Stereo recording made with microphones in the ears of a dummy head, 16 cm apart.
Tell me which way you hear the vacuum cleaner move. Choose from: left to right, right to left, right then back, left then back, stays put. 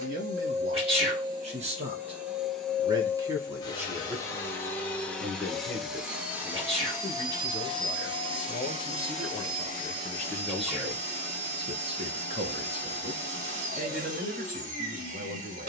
left then back.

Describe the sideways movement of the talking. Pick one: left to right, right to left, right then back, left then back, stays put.
left then back.